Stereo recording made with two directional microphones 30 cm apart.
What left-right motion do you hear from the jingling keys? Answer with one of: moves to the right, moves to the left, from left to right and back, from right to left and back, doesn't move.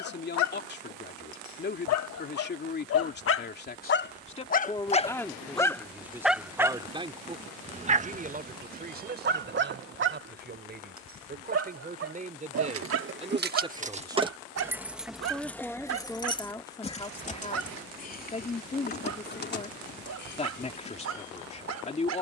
moves to the left.